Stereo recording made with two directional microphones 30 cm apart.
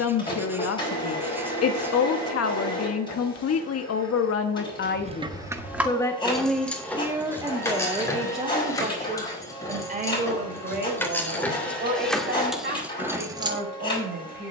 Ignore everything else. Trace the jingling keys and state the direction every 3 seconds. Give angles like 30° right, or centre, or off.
off, 10° right, 10° left, 10° left, centre.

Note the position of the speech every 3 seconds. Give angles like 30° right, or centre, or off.
50° left, 40° left, 10° right, 30° right, 40° right.